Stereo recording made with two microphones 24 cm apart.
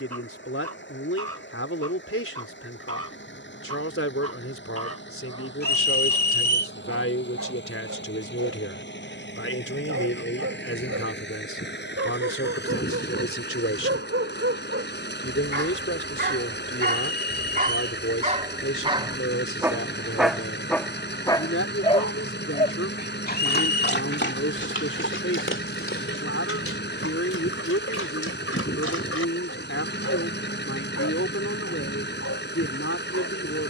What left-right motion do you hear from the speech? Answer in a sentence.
You can hear the speech stay in one place.